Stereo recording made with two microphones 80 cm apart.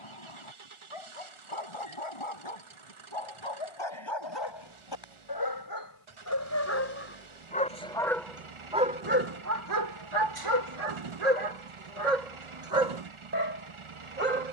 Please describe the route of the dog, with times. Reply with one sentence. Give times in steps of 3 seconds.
You can hear the dog on the left from 0 s, in the centre from 6 s and on the right from 9 s.